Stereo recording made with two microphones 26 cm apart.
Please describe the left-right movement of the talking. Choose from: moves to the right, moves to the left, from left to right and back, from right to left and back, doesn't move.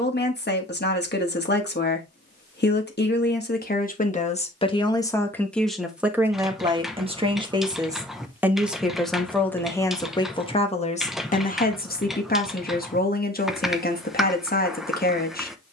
from left to right and back.